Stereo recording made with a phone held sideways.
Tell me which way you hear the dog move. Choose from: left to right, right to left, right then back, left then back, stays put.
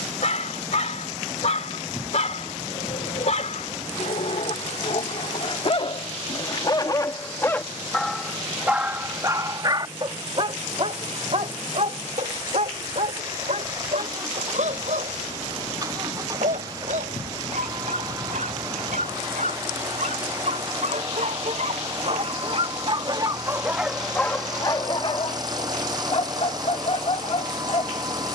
right then back.